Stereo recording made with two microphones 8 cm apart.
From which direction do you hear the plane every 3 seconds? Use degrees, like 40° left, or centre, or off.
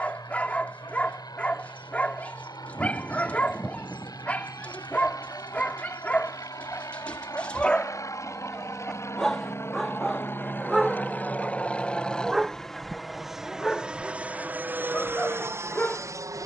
60° left, 50° left, 50° left, 30° left, 10° right, 30° right.